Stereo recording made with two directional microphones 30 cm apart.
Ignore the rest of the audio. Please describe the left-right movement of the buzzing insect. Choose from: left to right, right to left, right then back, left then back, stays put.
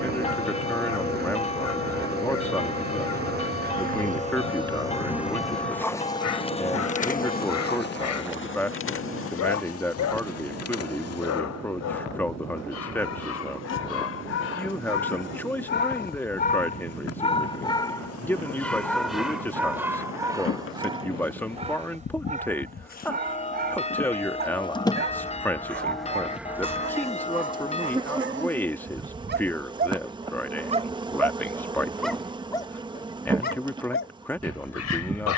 left then back.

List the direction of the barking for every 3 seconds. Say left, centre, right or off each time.
left, left, left, left, left, left, centre, right, right, right, centre, left.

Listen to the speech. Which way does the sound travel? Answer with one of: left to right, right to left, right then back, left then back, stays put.
stays put.